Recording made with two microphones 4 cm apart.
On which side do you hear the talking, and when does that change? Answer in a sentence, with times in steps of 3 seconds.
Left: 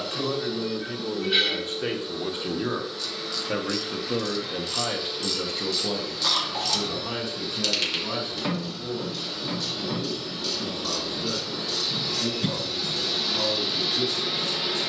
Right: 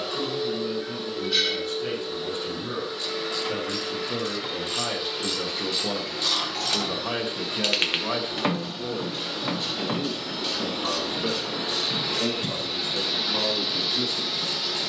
You can hear the talking on the left from 0 s, in the centre from 3 s and on the right from 6 s.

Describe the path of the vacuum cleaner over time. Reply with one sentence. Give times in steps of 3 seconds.
You can hear the vacuum cleaner on the right from 0 s and in the centre from 12 s.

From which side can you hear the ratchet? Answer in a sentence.
In this clip you hear the ratchet on the right.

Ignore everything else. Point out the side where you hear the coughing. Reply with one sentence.
In this clip you hear the coughing on the left.